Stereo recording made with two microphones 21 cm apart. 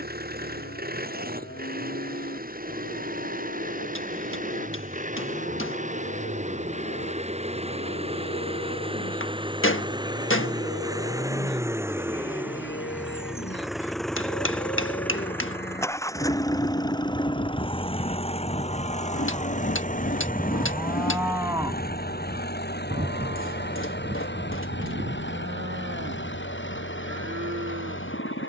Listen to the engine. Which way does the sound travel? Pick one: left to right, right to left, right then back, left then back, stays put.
right to left.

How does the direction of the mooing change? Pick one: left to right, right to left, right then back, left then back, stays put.
left to right.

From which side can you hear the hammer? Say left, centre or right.
left.